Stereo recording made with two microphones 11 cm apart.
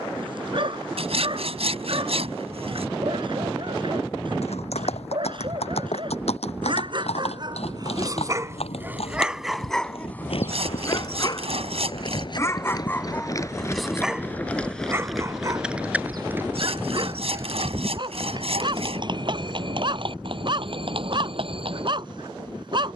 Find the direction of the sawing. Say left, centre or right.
right.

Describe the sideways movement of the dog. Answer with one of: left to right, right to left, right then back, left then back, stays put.
left then back.